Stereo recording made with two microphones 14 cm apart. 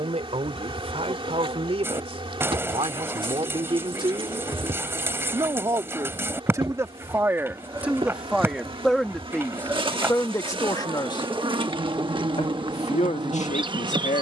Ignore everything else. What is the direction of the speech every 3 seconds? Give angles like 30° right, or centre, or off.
50° right, 30° right, 10° right, 20° left, 60° left.